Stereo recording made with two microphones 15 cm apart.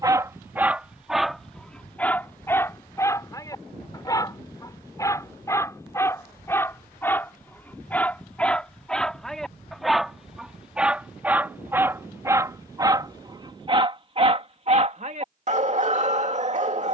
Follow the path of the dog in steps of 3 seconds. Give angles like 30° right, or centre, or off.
centre, 20° left, 10° left, centre, 30° right, 50° right.